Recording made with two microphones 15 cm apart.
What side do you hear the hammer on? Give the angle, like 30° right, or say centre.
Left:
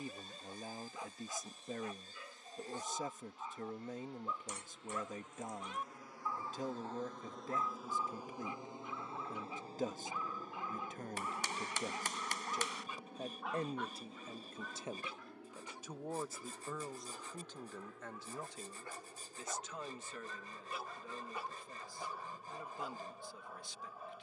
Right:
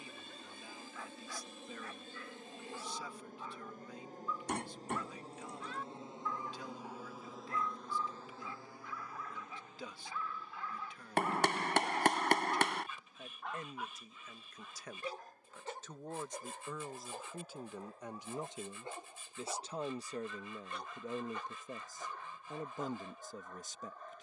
70° right.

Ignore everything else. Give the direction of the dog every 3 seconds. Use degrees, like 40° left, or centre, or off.
20° left, 20° left, 20° left, 20° left, centre, 50° right, 20° right, 10° left.